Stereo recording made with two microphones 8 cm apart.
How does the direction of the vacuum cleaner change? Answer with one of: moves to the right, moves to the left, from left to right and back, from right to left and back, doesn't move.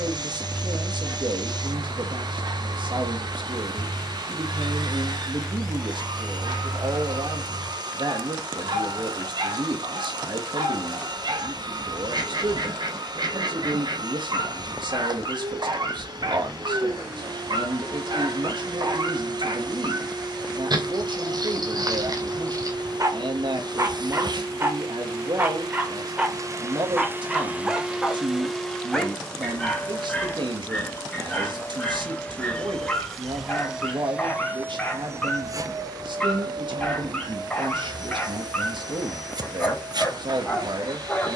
from right to left and back.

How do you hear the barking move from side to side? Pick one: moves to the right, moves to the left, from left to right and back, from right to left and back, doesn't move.
moves to the left.